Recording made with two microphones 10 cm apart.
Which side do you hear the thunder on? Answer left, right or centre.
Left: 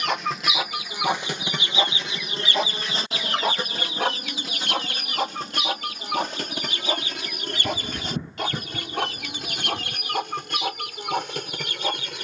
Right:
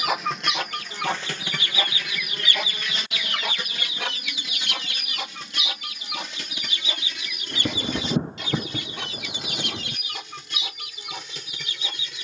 right.